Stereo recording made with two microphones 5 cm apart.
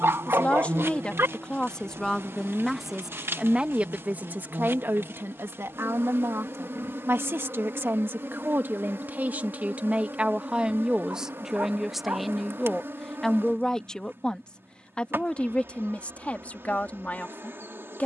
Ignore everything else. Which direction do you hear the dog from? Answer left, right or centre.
right.